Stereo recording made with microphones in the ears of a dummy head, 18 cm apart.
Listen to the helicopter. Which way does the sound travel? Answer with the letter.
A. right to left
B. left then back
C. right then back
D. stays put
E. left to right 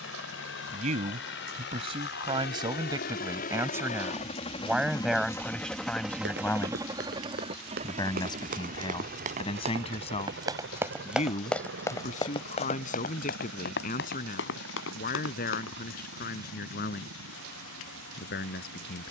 E.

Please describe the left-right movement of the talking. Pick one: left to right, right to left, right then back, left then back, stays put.
right to left.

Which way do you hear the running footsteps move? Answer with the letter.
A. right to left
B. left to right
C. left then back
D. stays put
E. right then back
A.